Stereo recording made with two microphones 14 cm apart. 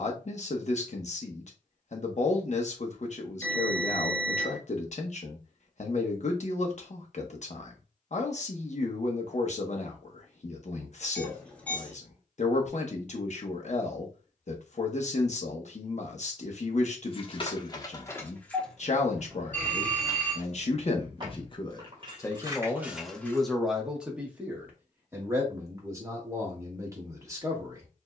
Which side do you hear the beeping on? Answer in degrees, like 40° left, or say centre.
10° left.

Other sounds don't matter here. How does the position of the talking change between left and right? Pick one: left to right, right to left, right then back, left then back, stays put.
left to right.